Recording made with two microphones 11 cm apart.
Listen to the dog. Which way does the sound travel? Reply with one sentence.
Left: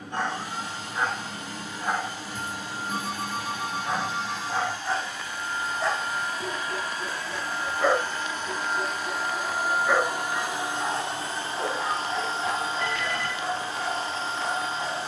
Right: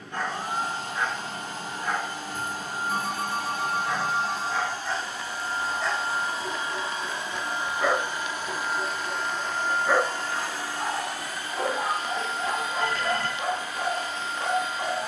You can hear the dog travel towards the right.